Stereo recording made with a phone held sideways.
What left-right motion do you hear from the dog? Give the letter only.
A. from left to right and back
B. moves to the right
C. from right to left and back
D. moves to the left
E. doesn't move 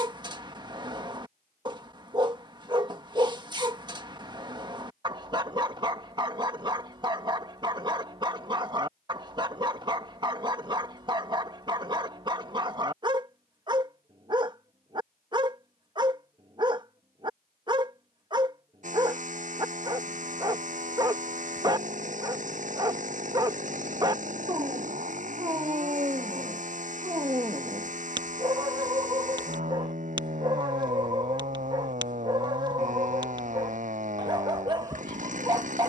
E.